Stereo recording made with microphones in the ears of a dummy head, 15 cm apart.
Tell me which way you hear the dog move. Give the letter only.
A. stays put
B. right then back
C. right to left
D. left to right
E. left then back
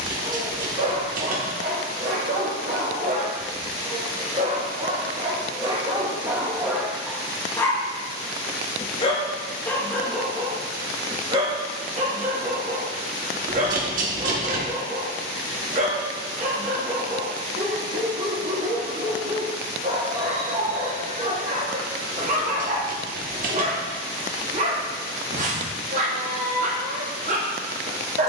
E.